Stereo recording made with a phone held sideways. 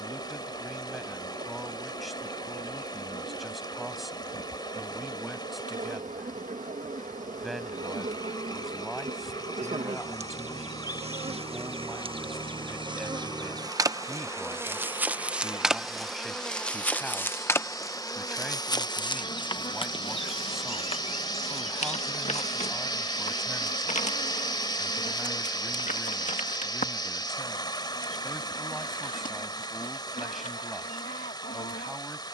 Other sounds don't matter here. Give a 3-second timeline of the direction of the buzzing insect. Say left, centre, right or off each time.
right, right, right, right, right, centre, left, left, left, left, left.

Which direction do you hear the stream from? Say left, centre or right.
left.